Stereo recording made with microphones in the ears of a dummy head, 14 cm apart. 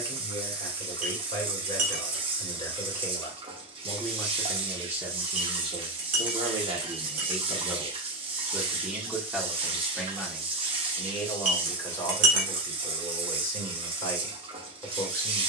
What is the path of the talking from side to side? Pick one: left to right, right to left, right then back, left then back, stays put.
right then back.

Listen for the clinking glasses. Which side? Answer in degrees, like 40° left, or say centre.
50° right.